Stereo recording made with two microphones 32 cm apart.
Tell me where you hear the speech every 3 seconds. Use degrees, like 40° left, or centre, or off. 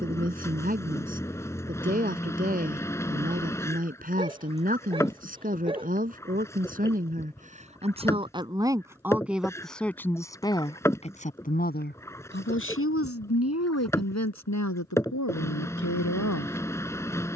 30° right, 30° right, 20° right, 10° left, 50° left, 60° left.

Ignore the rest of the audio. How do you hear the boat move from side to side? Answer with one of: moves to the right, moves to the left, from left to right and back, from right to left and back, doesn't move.
doesn't move.